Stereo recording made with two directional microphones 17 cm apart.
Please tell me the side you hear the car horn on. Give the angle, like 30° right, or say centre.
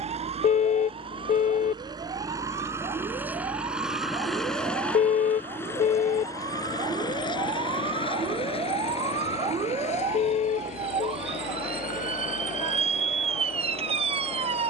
50° left.